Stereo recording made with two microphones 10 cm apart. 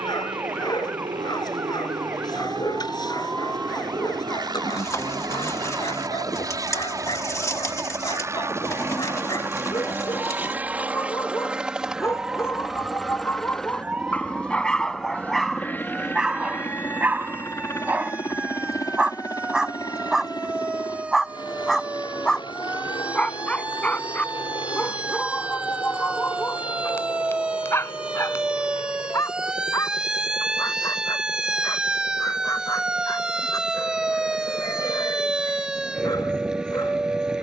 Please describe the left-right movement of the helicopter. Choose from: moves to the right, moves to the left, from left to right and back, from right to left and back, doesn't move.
moves to the left.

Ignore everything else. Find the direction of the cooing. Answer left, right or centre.
left.